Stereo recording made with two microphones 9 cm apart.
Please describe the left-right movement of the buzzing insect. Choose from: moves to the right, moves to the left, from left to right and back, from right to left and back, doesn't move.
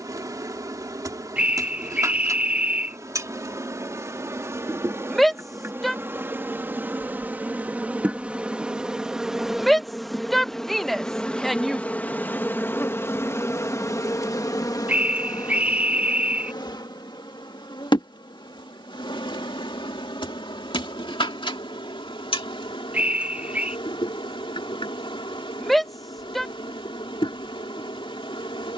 moves to the left.